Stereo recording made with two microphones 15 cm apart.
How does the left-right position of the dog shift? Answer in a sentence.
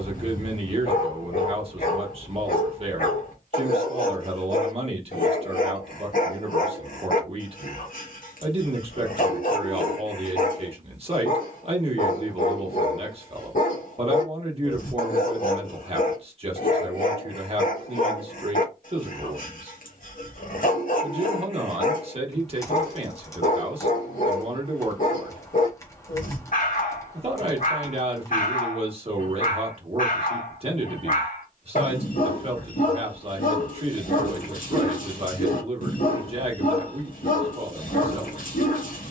You can hear the dog stay put.